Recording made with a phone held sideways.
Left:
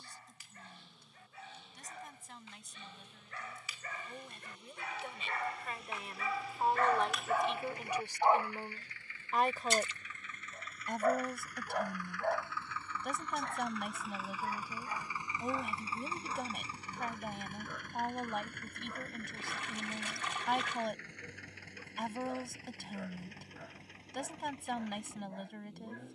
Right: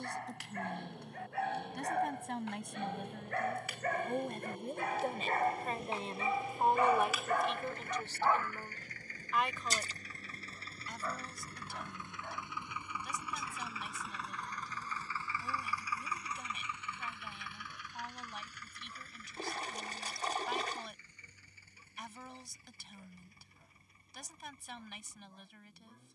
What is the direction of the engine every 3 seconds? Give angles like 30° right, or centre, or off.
60° right, 50° right, 50° right, 30° right, 10° right, 30° left, 60° left, 70° left, 80° left.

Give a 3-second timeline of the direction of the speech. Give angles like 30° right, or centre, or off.
70° right, 50° right, centre, 50° left, 60° left, 60° left, 60° left, 60° left, 60° left.